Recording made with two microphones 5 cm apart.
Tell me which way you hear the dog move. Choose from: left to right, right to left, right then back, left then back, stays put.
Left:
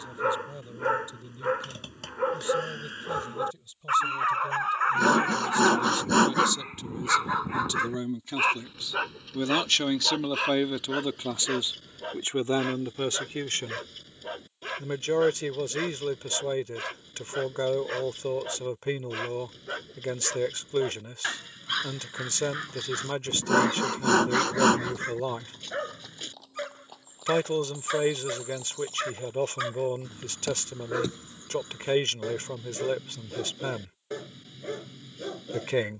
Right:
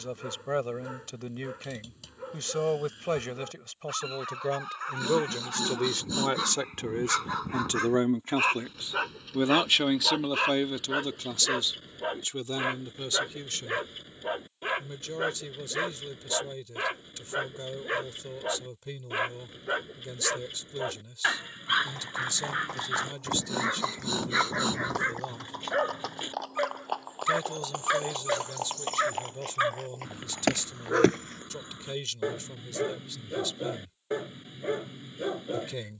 left to right.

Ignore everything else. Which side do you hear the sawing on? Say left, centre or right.
left.